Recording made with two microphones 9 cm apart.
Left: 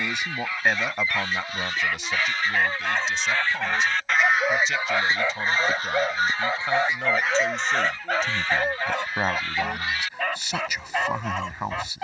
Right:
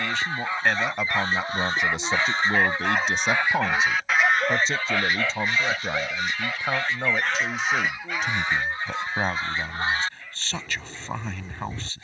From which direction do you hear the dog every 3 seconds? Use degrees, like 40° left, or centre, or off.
20° right, 10° left, 50° left, 80° left.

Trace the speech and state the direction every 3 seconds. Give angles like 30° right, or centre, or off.
10° right, 30° right, 10° right, 10° left.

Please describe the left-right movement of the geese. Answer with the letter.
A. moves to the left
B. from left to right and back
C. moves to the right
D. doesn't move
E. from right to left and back
E.